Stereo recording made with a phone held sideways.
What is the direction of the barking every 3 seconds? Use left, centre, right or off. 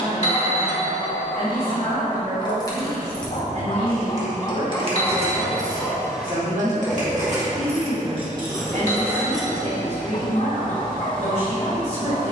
left, left, centre, left.